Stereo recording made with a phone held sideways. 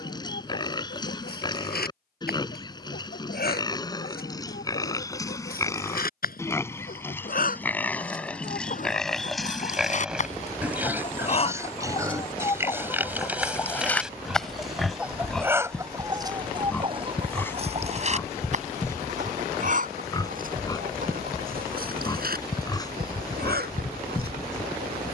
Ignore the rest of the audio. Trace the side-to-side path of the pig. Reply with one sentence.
In this clip you hear the pig move from left to right and back again.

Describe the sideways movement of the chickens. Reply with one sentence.
You can hear the chickens move from left to right.